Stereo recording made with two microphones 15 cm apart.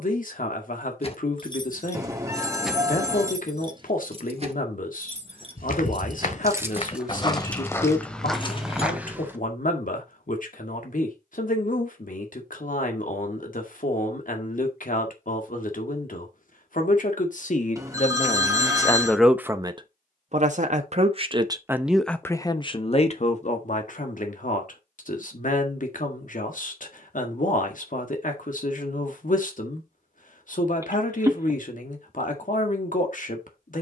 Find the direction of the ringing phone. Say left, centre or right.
right.